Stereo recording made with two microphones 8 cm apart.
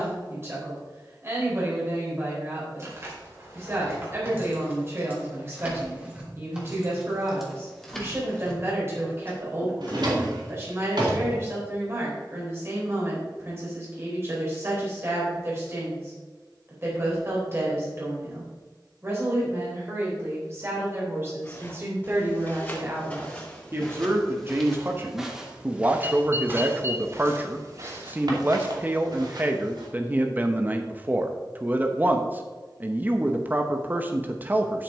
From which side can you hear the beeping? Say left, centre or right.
right.